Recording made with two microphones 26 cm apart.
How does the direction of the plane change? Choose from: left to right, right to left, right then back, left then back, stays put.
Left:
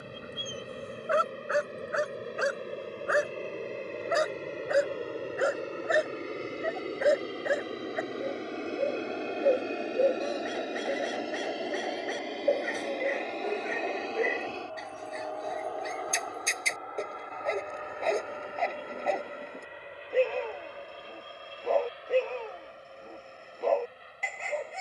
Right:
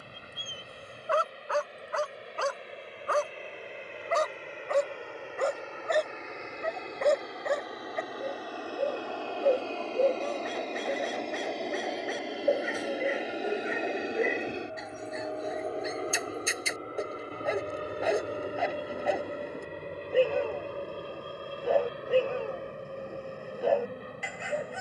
left to right.